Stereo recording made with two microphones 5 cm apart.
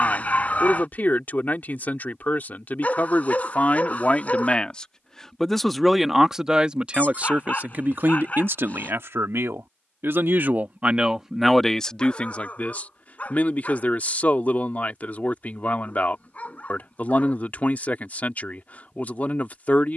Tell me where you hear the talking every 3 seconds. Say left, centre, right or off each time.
left, left, right, right, left, left, left.